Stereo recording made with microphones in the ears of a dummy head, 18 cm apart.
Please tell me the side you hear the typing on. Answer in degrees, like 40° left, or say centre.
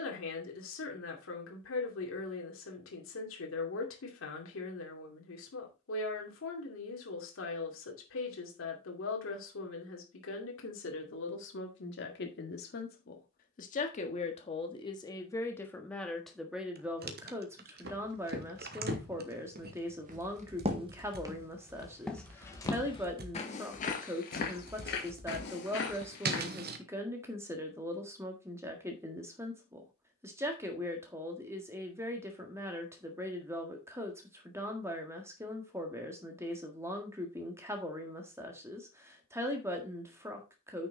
50° right.